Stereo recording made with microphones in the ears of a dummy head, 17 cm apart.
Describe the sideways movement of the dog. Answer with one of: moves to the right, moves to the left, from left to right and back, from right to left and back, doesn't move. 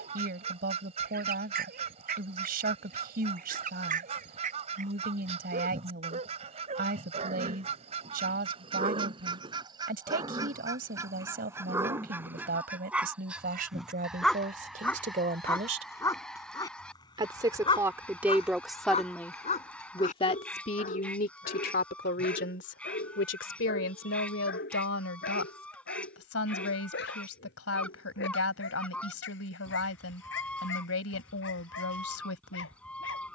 moves to the left.